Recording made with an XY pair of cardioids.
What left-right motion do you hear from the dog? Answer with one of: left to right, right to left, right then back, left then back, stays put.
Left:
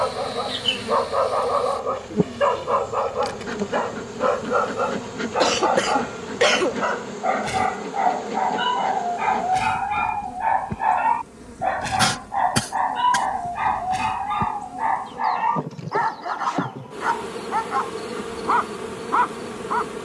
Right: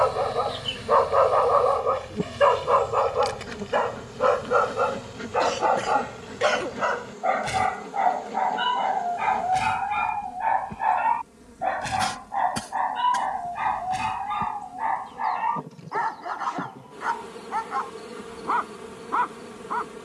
right to left.